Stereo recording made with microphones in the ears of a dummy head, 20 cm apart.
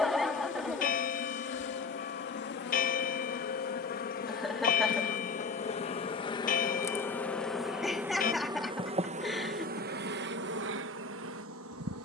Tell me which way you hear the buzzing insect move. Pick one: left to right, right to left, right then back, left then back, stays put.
left to right.